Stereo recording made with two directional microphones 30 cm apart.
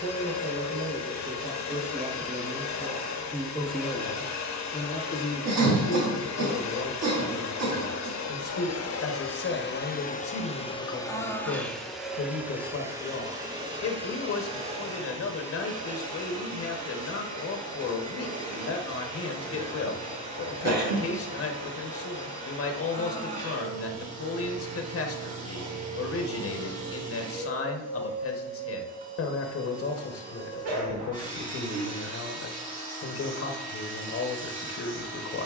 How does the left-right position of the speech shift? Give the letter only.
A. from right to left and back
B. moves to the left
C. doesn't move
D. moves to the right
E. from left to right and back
B.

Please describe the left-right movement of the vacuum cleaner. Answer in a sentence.
You can hear the vacuum cleaner go from the left side to the right.